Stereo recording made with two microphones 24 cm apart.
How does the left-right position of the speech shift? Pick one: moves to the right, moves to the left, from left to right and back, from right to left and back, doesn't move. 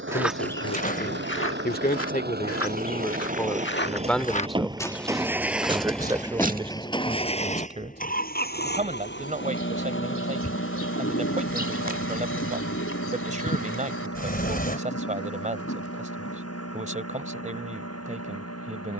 moves to the right.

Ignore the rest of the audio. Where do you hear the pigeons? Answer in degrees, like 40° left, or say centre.
60° left.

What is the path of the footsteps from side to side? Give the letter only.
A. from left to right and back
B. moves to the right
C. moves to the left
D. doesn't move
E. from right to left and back
E.